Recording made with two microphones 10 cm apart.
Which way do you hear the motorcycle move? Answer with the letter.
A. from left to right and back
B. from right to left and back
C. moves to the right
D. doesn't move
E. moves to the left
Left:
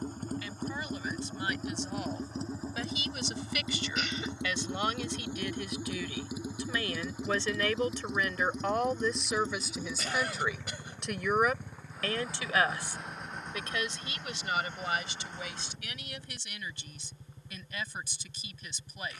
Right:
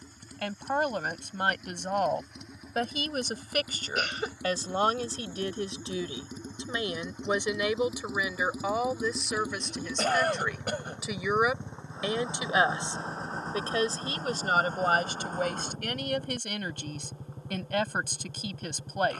C.